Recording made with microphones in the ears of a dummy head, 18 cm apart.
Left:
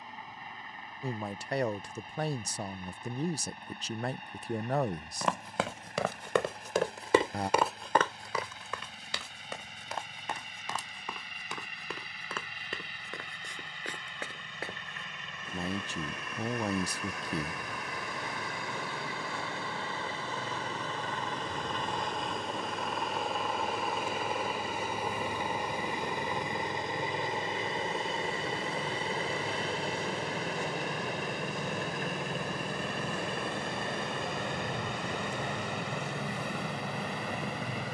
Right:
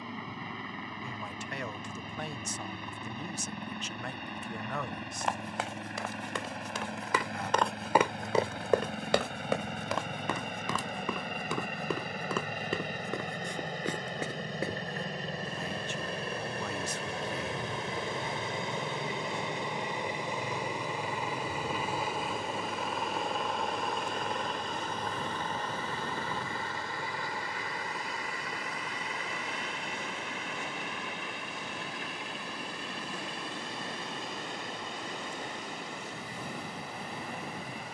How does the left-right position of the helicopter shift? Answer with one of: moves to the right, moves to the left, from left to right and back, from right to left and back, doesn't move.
moves to the left.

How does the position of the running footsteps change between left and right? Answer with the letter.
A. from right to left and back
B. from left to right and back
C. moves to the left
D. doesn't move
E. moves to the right
E.